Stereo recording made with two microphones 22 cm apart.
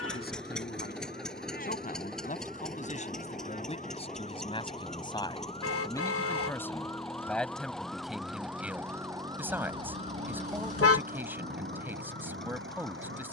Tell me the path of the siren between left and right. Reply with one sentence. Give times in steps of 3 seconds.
In this clip you hear the siren on the left from 0 s, in the centre from 6 s and on the right from 9 s.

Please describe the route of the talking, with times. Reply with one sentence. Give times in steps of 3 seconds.
You can hear the talking on the left from 0 s and in the centre from 6 s.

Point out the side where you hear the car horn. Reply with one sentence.
You can hear the car horn on the left.